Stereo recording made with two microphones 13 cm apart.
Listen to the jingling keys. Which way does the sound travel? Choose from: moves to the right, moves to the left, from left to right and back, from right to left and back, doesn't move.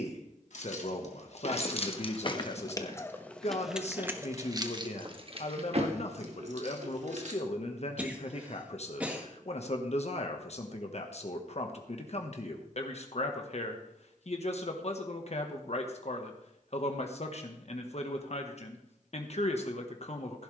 moves to the right.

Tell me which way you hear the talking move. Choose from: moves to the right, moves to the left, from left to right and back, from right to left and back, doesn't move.
doesn't move.